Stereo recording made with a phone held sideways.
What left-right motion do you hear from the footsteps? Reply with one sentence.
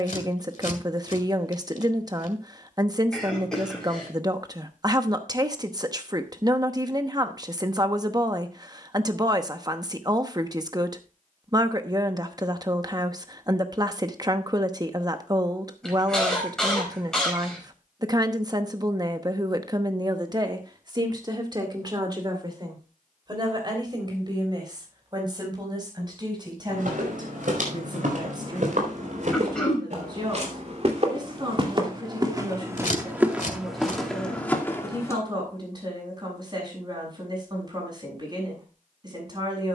In this clip you hear the footsteps move to the left.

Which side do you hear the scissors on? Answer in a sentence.
In this clip you hear the scissors on the left.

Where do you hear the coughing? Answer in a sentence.
In this clip you hear the coughing in the centre.